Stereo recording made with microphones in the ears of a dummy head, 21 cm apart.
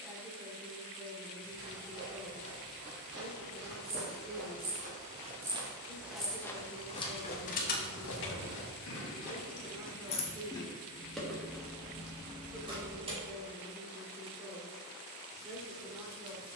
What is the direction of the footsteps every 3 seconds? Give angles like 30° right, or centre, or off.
50° right, 40° right, 40° left, 80° left, off, off.